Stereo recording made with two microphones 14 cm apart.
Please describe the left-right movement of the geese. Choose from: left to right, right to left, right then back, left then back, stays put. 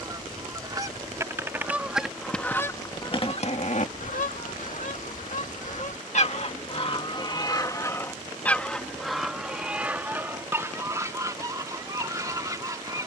left then back.